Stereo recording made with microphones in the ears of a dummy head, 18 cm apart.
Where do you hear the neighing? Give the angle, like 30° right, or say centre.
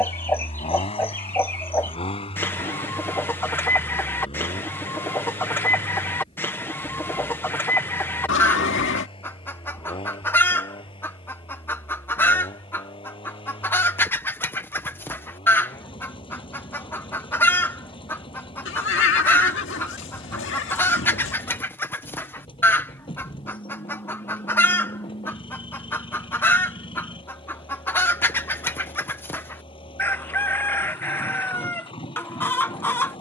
60° left.